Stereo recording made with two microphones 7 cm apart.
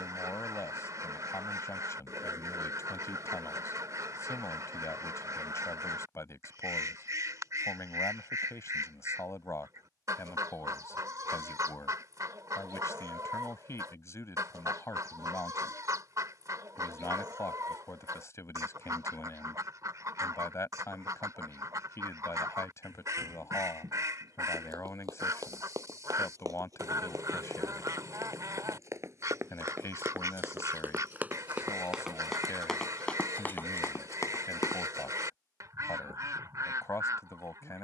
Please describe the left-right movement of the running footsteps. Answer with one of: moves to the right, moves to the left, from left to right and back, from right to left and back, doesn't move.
moves to the left.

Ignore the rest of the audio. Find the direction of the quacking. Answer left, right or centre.
right.